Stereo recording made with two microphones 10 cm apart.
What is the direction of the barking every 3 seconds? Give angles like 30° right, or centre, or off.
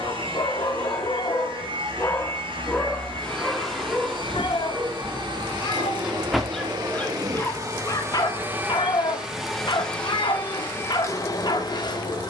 30° left, 10° right, 30° left, 50° left.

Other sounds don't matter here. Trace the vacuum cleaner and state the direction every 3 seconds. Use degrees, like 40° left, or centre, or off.
70° right, 60° right, 30° right, 20° left.